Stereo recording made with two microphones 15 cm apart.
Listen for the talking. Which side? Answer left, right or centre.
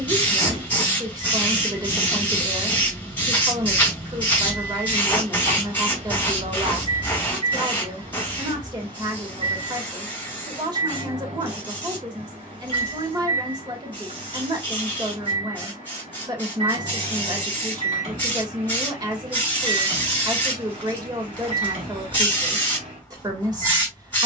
right.